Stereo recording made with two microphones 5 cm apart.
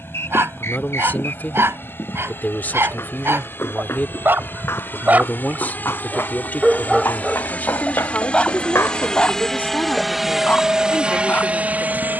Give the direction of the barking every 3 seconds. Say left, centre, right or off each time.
right, right, centre, left.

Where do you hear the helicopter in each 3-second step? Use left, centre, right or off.
left, left, left, centre.